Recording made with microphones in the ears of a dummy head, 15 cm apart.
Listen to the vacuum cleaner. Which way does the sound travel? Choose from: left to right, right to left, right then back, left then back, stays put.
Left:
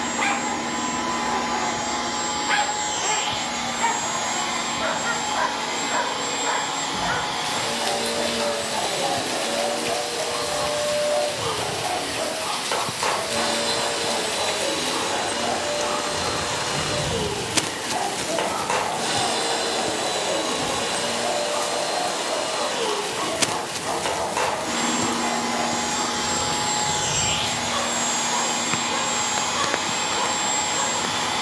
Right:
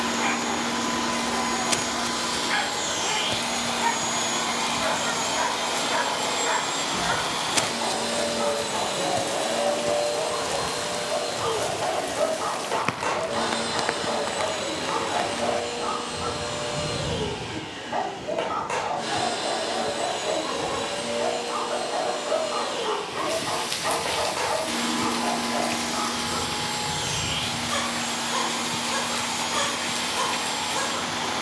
right to left.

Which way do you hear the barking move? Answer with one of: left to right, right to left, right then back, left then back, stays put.
left to right.